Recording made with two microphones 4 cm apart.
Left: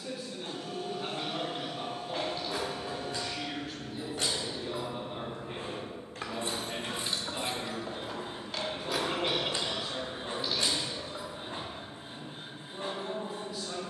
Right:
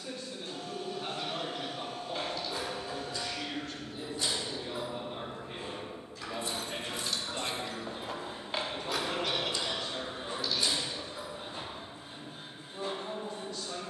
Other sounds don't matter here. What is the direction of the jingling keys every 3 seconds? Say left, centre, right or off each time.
left, left, centre, left, off.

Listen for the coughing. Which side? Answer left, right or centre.
left.